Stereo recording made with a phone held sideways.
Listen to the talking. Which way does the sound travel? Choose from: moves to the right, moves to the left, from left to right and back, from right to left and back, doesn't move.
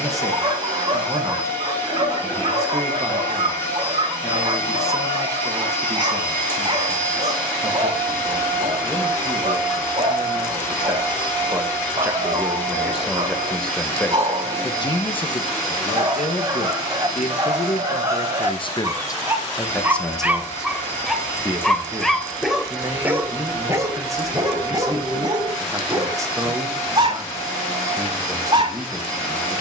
from right to left and back.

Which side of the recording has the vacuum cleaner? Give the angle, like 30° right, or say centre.
20° left.